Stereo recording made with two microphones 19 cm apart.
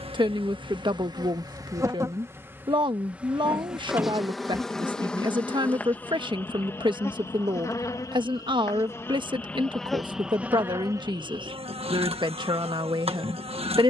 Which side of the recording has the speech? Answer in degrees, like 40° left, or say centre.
20° right.